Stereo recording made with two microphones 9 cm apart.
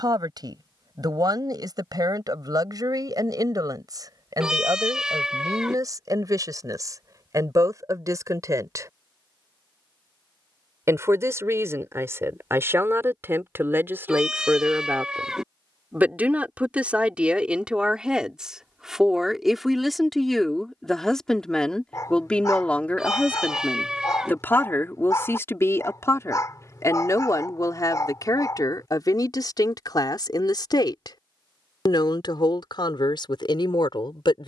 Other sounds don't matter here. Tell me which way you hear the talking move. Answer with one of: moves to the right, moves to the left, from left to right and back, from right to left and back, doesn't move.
moves to the left.